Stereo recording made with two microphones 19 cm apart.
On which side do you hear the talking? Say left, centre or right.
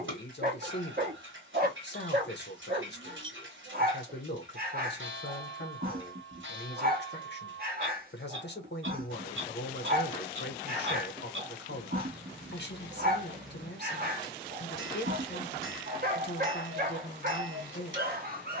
left.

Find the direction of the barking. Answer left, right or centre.
right.